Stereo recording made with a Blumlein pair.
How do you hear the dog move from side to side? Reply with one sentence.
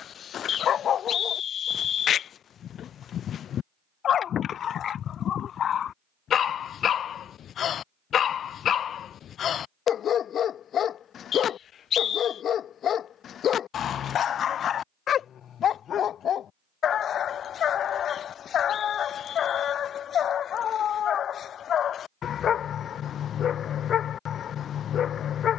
In this clip you hear the dog stay in one place.